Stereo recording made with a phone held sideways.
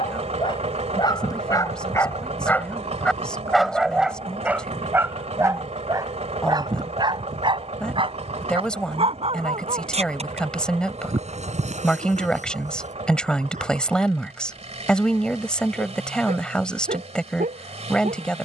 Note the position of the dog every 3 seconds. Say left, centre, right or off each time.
left, centre, right, right, right, right.